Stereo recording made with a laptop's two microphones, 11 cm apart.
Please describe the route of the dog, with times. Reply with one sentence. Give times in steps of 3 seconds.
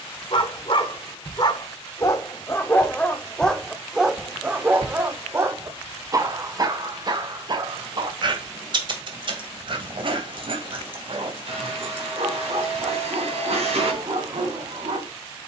In this clip you hear the dog on the left from 0 s, in the centre from 3 s and on the right from 6 s.